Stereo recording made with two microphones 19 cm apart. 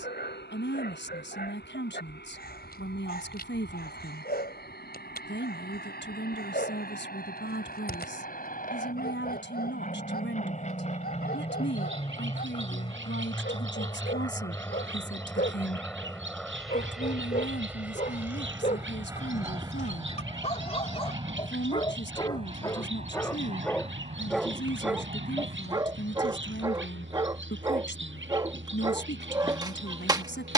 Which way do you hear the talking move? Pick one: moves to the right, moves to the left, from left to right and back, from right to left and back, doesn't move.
doesn't move.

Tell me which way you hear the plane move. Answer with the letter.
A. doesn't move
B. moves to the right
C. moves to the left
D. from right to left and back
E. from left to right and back
B.